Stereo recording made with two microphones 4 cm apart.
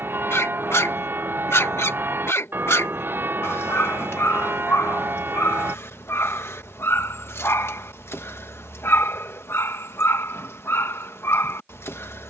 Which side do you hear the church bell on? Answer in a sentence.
In this clip you hear the church bell on the right.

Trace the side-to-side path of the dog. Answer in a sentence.
You can hear the dog stay put.